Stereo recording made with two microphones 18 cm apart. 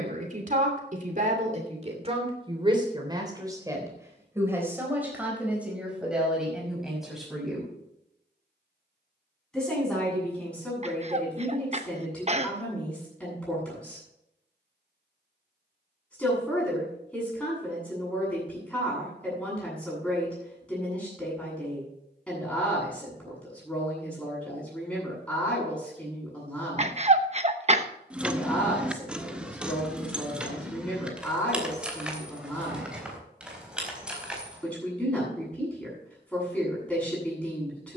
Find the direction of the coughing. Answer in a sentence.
You can hear the coughing on the right.